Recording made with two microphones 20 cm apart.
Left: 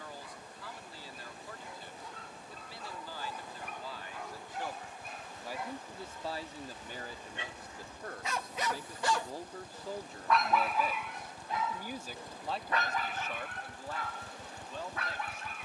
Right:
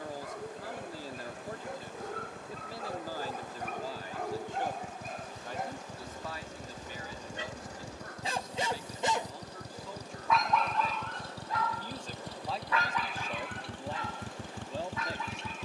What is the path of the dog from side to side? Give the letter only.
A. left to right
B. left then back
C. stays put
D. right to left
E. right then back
D.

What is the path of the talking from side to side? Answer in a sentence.
In this clip you hear the talking move from right to left and back again.